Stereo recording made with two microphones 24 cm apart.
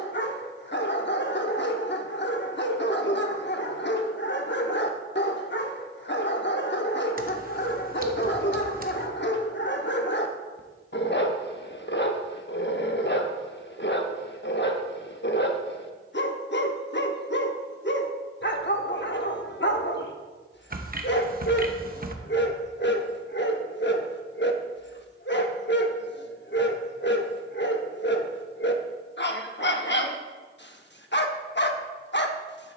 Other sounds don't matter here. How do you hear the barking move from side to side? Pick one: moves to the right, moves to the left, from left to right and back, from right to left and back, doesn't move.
doesn't move.